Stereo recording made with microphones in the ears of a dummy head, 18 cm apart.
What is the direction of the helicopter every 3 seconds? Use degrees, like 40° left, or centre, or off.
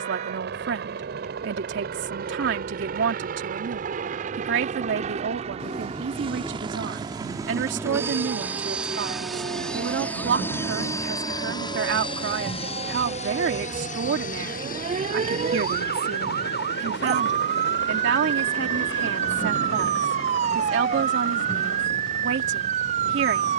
50° right, 40° right, 20° right, 10° left, 30° left, 50° left, 60° left, 70° left.